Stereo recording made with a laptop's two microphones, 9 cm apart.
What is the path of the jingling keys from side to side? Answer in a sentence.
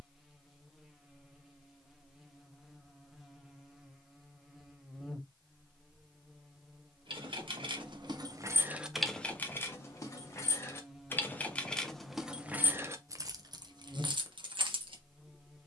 You can hear the jingling keys go left and come back.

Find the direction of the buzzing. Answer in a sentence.
In this clip you hear the buzzing in the centre.